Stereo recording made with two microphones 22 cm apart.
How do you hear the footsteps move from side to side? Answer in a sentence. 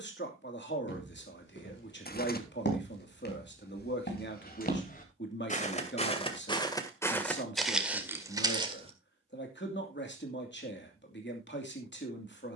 You can hear the footsteps move to the right.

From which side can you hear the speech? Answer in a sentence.
In this clip you hear the speech on the left.